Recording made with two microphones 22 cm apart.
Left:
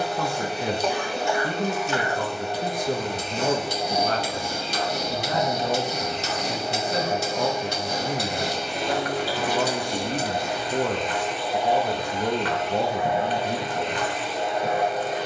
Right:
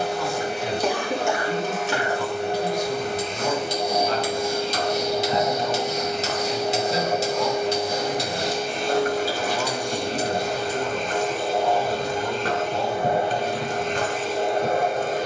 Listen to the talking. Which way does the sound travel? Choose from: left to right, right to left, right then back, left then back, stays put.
stays put.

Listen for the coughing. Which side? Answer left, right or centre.
right.